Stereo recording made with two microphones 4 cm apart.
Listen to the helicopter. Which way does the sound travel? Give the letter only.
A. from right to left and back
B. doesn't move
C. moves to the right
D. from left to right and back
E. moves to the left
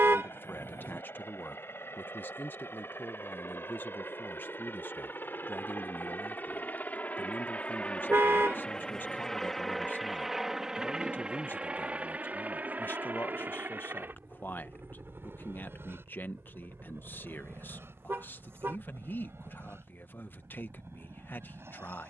C.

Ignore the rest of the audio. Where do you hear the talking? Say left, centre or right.
left.